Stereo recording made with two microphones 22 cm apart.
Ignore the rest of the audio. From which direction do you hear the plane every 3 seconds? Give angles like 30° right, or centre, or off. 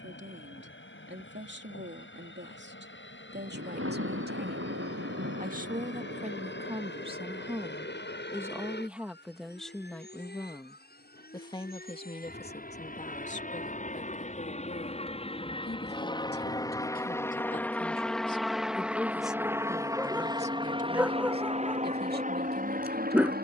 70° left, 60° left, 60° left, 50° left, 40° left, 20° left, 10° right, 30° right.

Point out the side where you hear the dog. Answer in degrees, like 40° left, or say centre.
10° right.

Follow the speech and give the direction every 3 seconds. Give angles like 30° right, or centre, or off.
60° right, 40° right, 20° right, 10° left, 30° left, 40° left, 10° right, 50° right.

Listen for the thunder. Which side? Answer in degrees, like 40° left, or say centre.
70° right.